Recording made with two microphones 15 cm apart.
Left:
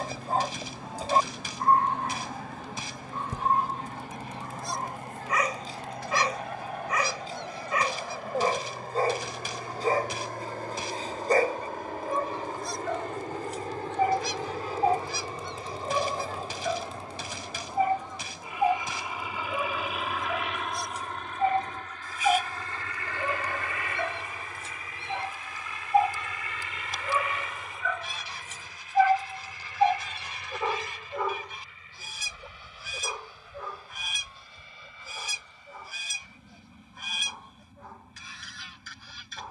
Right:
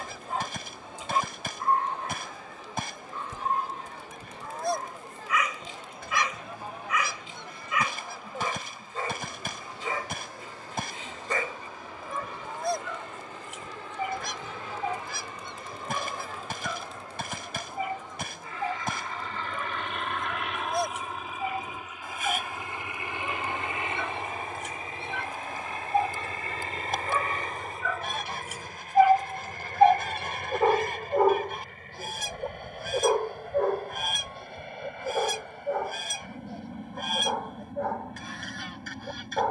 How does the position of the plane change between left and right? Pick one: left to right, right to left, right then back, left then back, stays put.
left to right.